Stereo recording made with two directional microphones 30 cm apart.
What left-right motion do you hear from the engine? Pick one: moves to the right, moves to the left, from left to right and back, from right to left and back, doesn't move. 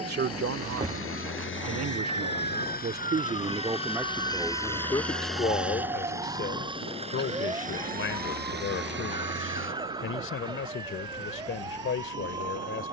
moves to the right.